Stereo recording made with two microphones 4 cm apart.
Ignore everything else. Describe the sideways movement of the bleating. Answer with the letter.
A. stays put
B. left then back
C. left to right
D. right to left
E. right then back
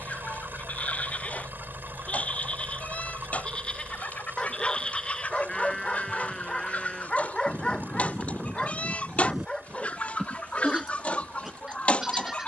C.